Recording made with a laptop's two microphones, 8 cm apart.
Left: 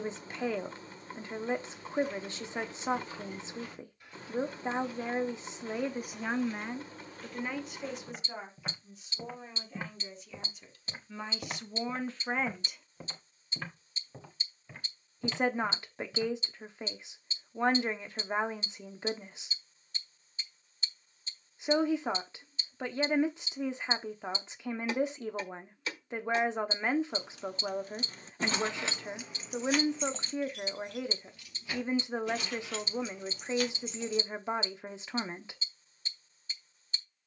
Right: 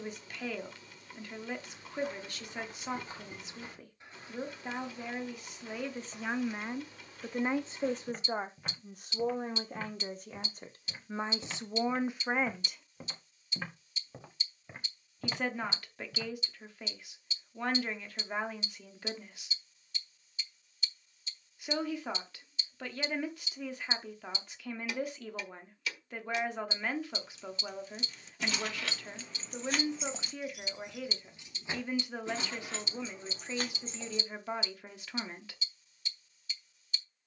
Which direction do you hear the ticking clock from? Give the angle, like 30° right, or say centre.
40° left.